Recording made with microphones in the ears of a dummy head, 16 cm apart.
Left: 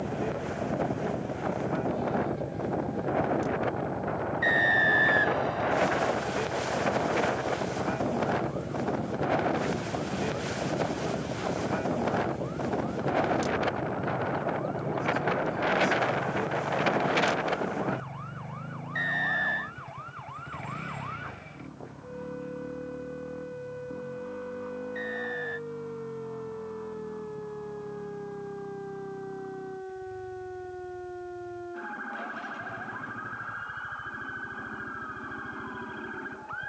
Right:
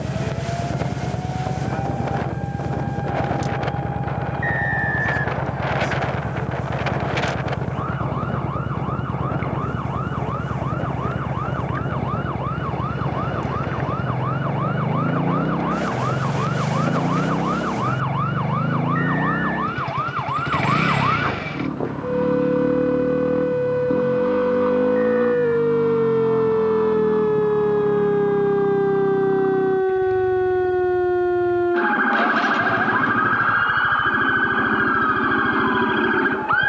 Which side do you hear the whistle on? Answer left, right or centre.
left.